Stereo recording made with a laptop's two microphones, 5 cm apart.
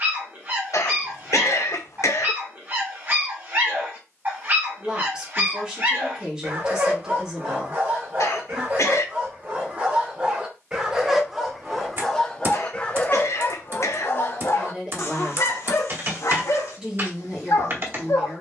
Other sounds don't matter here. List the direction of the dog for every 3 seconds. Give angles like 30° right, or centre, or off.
40° right, 40° right, 40° right, 20° right, 30° left, 70° left.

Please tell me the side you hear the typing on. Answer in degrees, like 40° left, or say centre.
40° right.